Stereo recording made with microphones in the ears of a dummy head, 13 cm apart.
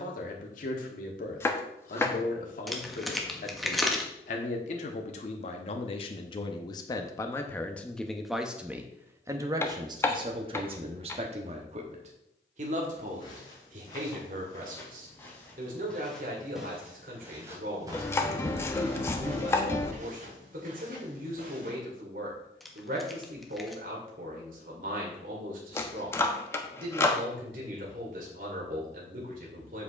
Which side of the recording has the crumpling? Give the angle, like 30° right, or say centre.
centre.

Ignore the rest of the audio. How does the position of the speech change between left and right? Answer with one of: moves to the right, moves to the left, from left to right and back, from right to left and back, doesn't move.
moves to the right.